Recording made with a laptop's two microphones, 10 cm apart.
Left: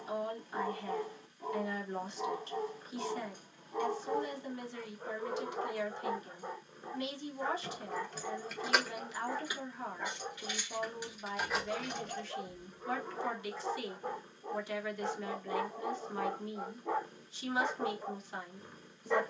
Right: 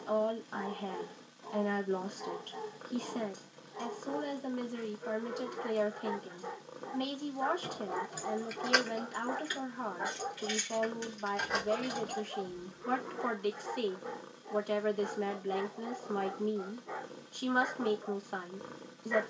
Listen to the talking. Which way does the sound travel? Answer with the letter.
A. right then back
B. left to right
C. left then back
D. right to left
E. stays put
E.